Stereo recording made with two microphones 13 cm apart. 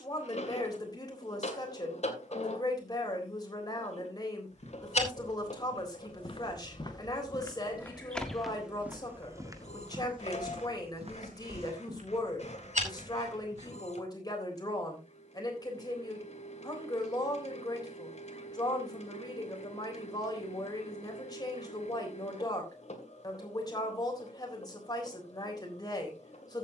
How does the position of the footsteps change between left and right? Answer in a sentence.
You can hear the footsteps move to the right.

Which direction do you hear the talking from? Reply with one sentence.
In this clip you hear the talking on the left.